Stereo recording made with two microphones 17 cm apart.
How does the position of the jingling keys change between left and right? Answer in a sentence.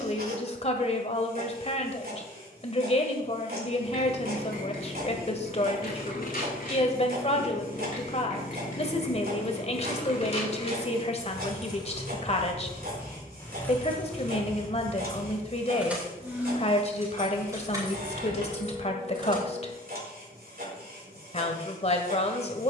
In this clip you hear the jingling keys move from left to right.